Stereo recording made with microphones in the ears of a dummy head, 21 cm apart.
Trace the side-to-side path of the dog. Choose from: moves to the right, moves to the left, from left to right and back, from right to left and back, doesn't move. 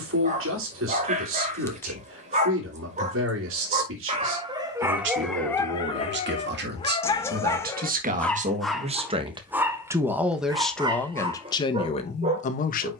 from right to left and back.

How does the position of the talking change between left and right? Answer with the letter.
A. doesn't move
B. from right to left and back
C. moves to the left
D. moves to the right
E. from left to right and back
C.